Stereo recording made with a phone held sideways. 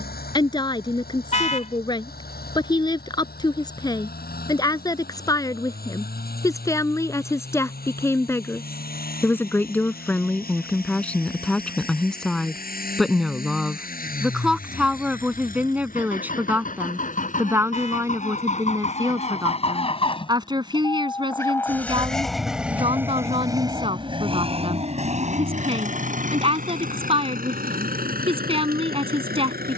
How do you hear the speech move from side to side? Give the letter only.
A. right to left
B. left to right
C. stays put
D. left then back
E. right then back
B.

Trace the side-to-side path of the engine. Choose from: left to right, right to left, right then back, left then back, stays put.
left to right.